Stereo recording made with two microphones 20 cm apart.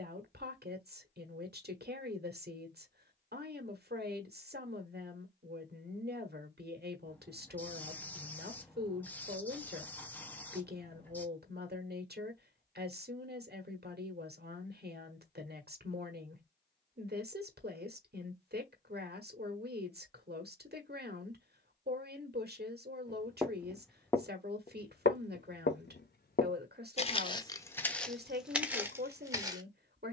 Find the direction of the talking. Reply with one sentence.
In this clip you hear the talking on the right.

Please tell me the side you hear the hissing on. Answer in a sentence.
In this clip you hear the hissing in the centre.